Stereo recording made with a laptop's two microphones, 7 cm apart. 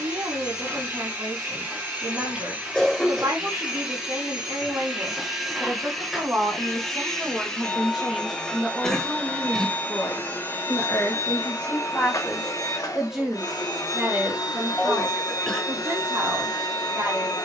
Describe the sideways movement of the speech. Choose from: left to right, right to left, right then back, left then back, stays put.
left then back.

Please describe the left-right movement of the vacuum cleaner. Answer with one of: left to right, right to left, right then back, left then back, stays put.
right to left.